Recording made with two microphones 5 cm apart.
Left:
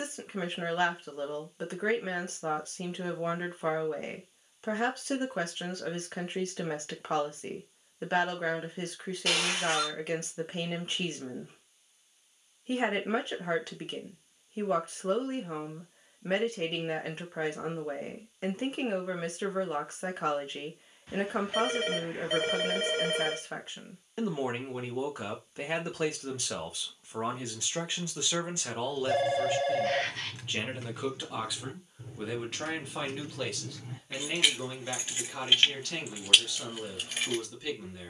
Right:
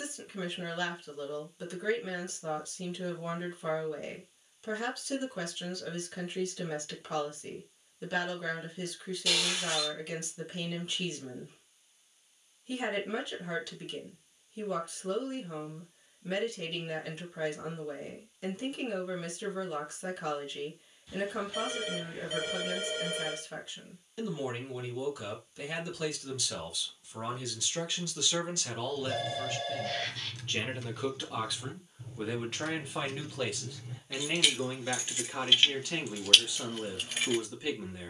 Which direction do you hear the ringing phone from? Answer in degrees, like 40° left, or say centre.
50° left.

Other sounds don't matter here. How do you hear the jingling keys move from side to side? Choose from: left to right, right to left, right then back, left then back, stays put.
left then back.